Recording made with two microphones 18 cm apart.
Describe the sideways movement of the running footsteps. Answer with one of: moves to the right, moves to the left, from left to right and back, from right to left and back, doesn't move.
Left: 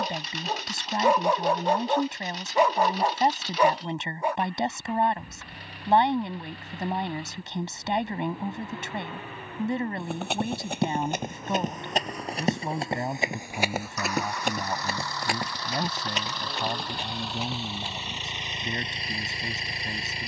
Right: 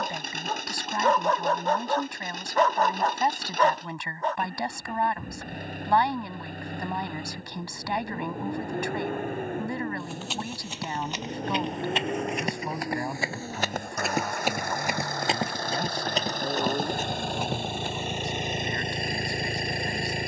moves to the right.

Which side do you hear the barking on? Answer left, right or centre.
centre.